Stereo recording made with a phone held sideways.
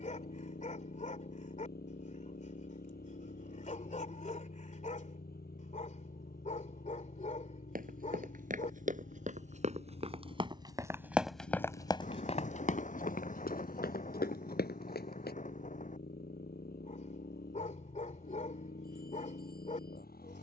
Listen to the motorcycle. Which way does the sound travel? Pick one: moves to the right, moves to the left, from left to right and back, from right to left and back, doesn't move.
doesn't move.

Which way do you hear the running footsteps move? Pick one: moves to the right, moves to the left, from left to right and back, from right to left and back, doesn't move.
moves to the left.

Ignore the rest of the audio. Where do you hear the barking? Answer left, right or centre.
left.